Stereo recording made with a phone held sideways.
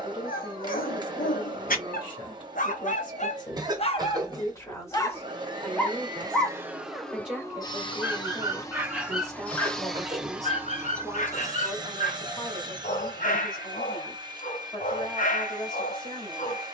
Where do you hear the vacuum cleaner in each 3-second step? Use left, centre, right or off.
right, right, centre, centre, right, right.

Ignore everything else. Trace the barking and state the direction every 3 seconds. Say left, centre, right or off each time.
left, left, centre, left, left, left.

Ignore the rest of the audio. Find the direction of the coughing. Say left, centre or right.
right.